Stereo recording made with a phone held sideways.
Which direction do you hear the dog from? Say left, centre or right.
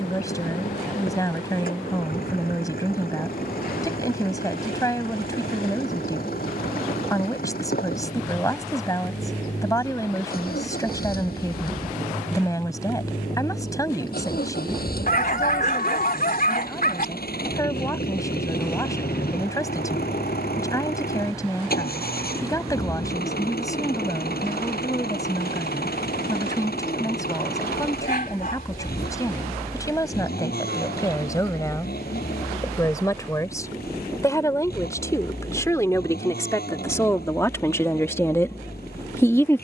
left.